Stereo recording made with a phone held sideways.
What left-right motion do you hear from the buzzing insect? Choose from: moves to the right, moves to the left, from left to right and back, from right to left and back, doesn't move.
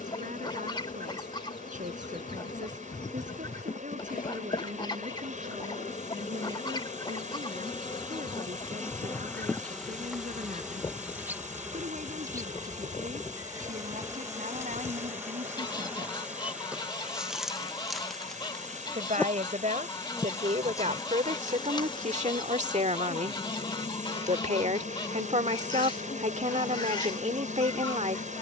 from left to right and back.